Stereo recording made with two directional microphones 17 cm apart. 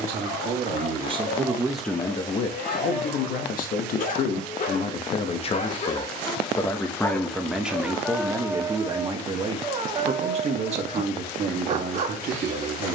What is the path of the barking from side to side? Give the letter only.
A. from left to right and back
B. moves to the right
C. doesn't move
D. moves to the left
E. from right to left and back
B.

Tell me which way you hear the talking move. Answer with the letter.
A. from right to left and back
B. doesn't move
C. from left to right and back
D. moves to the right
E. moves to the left
A.